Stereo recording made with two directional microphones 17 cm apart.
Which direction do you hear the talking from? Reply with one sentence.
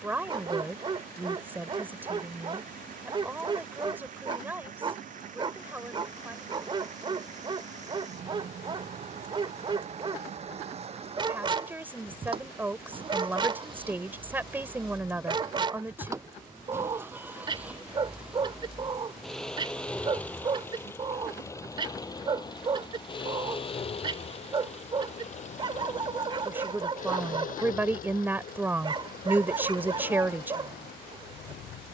You can hear the talking in the centre.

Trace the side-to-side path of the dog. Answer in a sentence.
You can hear the dog stay put.